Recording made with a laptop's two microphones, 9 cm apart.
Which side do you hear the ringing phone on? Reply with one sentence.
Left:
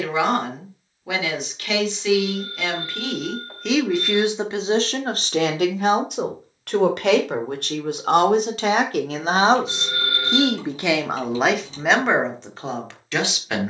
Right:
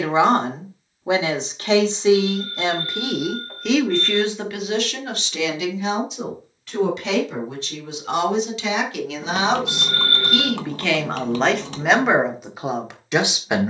You can hear the ringing phone in the centre.